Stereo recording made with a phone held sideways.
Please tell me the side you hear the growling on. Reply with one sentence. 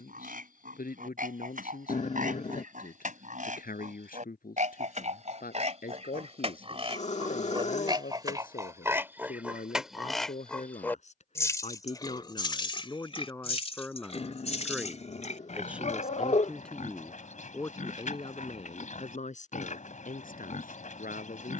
You can hear the growling on the left.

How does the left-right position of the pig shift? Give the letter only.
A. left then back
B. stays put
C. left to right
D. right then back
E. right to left
E.